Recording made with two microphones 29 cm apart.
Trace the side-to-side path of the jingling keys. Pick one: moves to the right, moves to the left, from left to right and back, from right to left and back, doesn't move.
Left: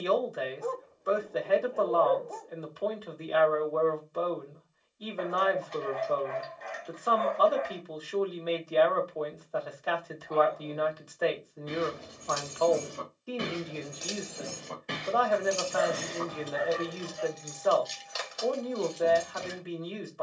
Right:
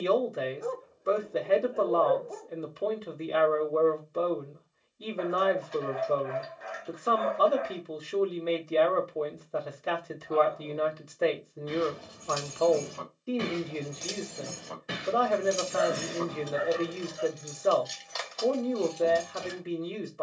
from left to right and back.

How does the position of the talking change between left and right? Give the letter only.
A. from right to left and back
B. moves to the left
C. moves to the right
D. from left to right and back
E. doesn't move
E.